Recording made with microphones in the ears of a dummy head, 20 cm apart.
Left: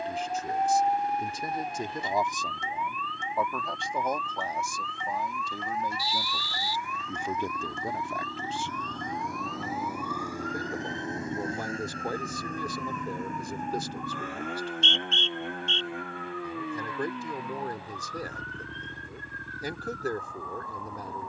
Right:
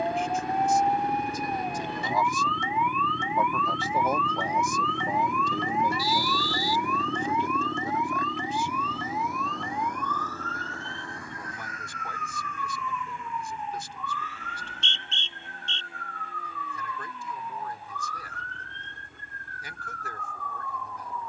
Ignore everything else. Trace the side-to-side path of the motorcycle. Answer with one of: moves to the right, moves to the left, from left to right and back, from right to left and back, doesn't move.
moves to the left.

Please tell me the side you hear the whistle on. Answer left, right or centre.
right.